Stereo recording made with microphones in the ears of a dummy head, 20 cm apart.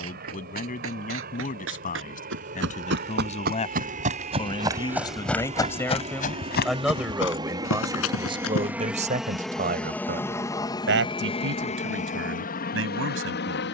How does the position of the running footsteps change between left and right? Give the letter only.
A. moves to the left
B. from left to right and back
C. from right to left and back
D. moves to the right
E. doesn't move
A.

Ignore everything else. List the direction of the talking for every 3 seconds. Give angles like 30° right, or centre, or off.
40° left, 20° left, 10° right, 50° right, 70° right.